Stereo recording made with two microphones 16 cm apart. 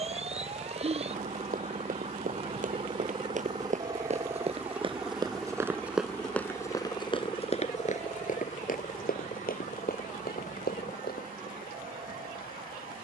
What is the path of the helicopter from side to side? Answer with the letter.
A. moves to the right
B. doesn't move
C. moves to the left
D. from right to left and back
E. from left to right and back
C.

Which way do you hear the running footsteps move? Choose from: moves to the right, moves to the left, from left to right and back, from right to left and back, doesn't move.
moves to the left.